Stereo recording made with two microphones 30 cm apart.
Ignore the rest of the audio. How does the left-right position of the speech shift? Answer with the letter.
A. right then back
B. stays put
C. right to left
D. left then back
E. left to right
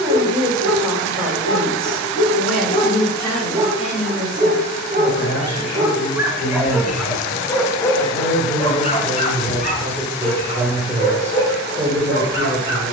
D.